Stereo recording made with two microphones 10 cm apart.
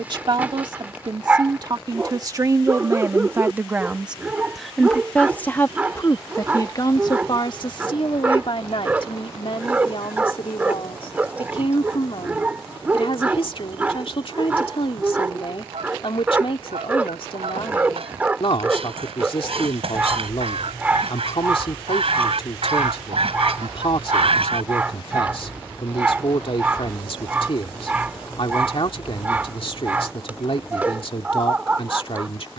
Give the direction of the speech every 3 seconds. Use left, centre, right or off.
right, centre, left, left, left, left, left, left, left, left, left.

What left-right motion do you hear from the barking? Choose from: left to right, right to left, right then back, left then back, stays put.
stays put.